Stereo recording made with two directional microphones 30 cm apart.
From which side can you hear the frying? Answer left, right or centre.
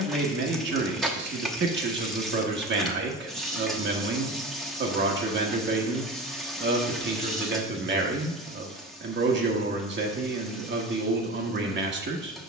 centre.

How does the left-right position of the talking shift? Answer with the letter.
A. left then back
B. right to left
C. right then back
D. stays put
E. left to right
D.